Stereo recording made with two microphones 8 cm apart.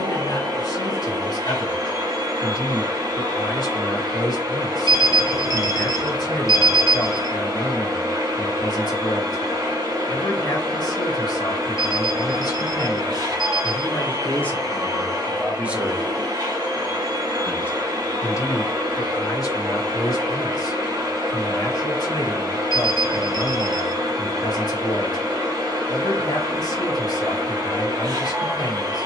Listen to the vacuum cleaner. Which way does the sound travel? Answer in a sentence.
You can hear the vacuum cleaner stay put.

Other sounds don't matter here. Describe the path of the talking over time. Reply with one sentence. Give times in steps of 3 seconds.
In this clip you hear the talking on the left from 0 s, in the centre from 15 s and on the left from 18 s.